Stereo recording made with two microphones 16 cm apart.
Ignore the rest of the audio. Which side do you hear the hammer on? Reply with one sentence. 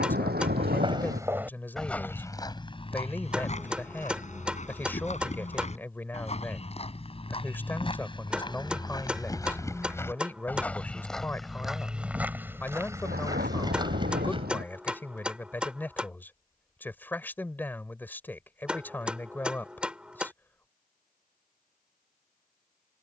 You can hear the hammer in the centre.